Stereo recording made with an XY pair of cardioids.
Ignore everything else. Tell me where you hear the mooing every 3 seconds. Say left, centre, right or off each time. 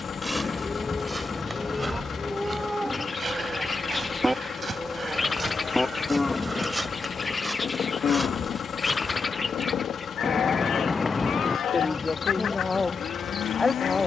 centre, centre, left, left, left.